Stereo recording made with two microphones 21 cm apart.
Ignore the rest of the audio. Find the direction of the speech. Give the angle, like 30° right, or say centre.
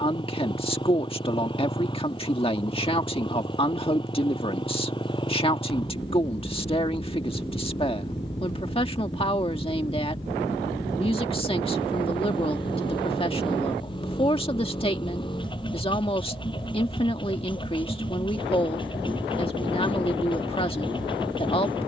30° left.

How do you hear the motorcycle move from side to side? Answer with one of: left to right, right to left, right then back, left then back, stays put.
stays put.